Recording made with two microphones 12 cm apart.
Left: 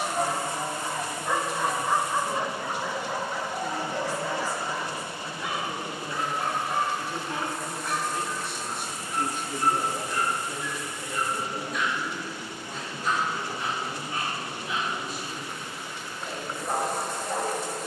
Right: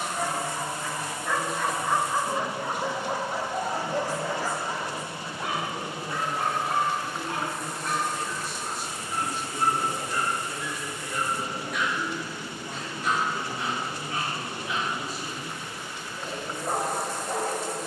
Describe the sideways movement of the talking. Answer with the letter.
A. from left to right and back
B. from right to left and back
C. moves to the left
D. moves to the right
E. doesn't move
D.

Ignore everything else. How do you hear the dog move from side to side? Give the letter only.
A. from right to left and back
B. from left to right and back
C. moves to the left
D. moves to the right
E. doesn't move
D.